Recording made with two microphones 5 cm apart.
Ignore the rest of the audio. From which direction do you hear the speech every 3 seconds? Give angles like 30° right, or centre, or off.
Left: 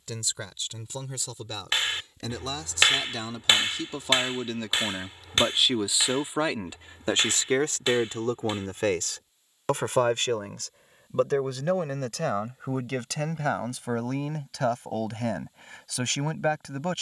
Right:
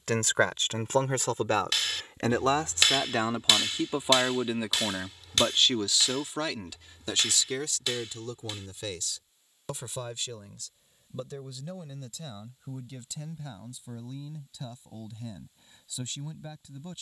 50° right, 10° right, 40° left, 60° left, 70° left, 70° left.